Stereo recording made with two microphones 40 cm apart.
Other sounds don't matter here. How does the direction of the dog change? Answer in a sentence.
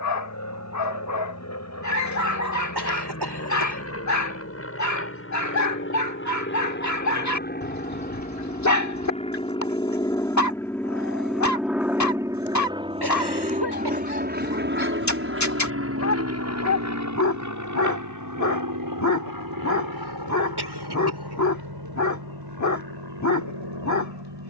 You can hear the dog stay in one place.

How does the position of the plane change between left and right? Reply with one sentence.
In this clip you hear the plane move from left to right.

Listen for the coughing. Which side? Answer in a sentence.
You can hear the coughing on the right.